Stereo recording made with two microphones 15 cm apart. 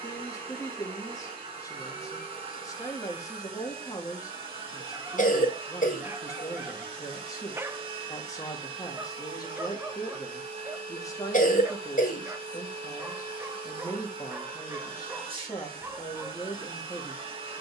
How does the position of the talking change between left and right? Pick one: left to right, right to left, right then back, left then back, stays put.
stays put.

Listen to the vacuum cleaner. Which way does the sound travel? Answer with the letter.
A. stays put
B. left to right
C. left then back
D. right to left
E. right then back
A.